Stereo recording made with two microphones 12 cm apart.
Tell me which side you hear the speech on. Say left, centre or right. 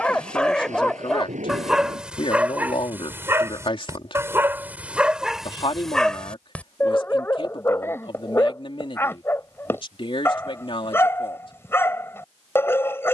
left.